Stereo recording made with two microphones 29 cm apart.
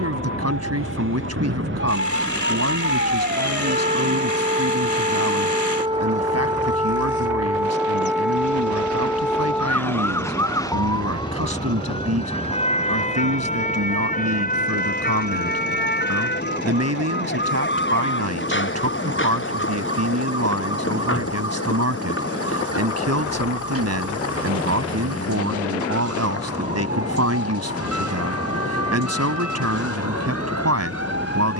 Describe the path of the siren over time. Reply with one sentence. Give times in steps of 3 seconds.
You can hear the siren on the right from 0 s, in the centre from 6 s and on the left from 12 s.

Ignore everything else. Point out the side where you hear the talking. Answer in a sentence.
In this clip you hear the talking on the right.